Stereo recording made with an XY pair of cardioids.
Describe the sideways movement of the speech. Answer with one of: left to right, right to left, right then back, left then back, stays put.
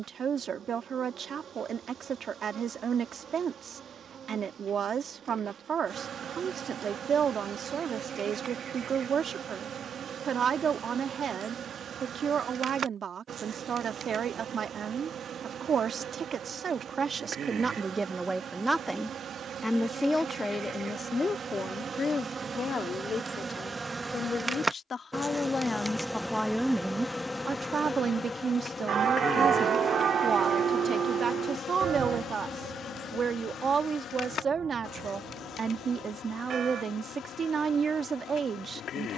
left then back.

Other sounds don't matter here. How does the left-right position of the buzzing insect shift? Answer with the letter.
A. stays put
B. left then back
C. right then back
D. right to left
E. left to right
D.